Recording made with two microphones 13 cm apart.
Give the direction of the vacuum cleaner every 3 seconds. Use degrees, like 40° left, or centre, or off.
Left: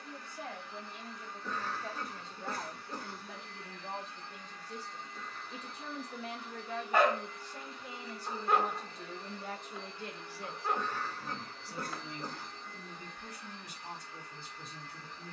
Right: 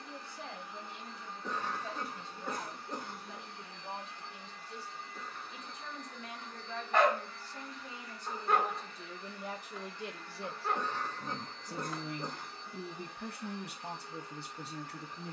20° right, 10° right, 20° left, 20° left, 10° right.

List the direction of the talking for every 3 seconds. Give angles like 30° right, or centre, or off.
50° left, 40° left, 20° left, 20° right, 70° right.